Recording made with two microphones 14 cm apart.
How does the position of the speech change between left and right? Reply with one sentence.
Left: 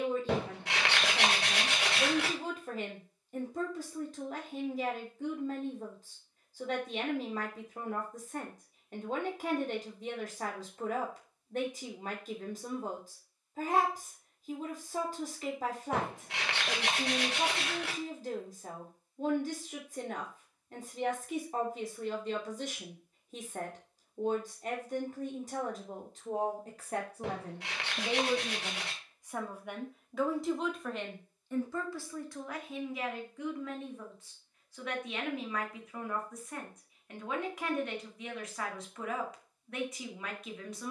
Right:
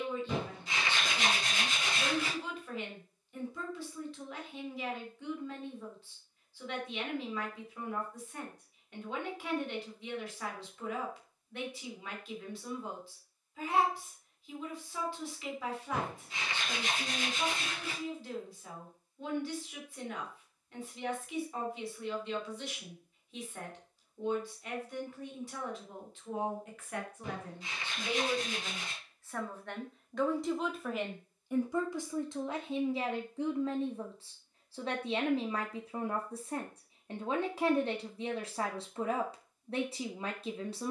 You can hear the speech travel towards the right.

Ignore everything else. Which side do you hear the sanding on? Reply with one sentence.
In this clip you hear the sanding on the left.